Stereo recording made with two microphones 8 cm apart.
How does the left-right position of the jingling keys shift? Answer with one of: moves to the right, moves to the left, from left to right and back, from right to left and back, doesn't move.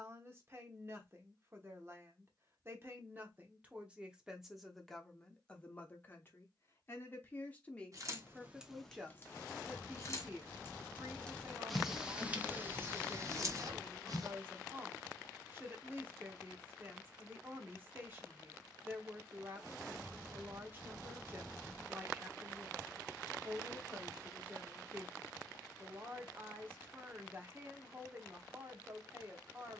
from right to left and back.